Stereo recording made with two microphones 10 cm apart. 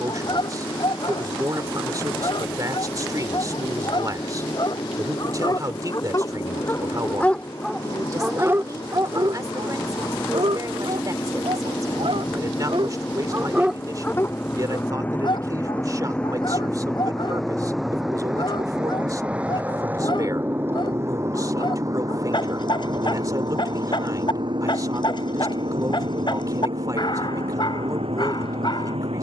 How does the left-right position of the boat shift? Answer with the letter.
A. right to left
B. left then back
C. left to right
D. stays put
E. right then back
C.